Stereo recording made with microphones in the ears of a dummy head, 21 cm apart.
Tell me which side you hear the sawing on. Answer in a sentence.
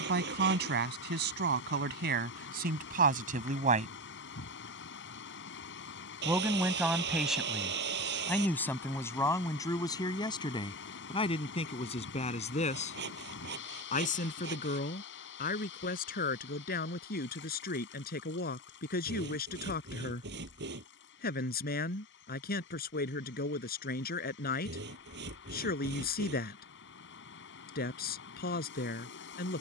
In this clip you hear the sawing on the right.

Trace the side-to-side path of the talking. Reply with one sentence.
In this clip you hear the talking go from the right side to the left.